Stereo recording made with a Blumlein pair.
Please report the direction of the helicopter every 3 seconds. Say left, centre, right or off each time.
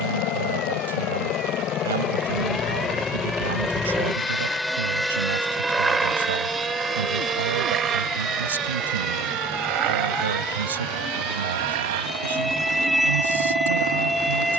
left, centre, right, right, right.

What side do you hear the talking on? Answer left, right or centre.
right.